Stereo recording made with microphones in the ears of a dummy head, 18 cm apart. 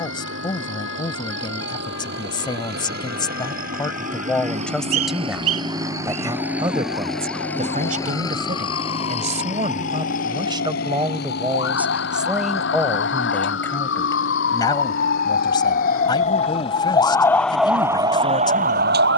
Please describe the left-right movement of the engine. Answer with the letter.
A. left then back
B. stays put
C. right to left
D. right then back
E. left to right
C.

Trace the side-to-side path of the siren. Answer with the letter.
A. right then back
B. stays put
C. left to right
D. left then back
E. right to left
C.